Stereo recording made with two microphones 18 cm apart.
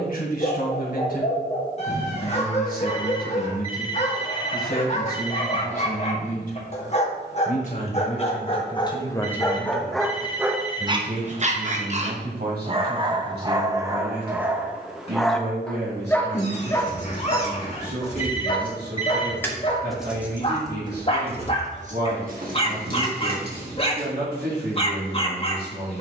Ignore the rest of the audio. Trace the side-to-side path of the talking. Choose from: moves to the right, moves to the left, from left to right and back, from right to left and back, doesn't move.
moves to the right.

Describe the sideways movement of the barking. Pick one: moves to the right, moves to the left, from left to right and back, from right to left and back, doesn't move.
from left to right and back.